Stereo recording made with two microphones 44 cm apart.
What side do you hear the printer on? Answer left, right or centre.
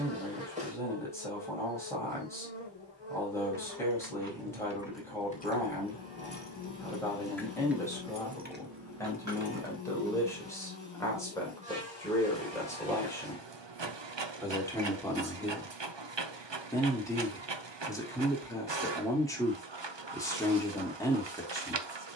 right.